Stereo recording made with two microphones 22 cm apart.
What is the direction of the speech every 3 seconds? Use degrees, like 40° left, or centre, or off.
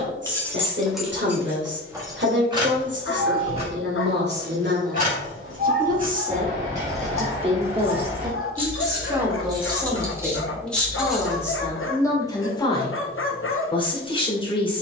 50° right, 50° right, 20° right, centre, 20° left.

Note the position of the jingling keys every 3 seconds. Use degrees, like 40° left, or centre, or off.
10° right, 30° right, 30° right, 10° right, off.